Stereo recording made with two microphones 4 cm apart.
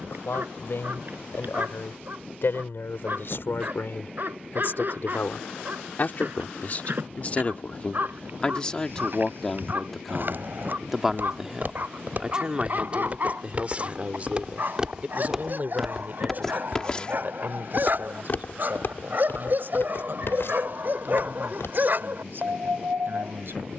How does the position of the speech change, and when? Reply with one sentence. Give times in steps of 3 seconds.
You can hear the speech on the left from 0 s, in the centre from 9 s and on the right from 12 s.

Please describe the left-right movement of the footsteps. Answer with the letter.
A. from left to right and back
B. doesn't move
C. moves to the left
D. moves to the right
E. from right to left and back
C.